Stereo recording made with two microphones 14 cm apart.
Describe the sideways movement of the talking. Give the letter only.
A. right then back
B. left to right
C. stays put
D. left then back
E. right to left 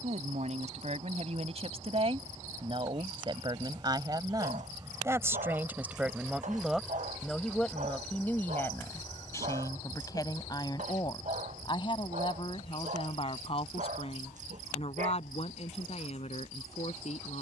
E.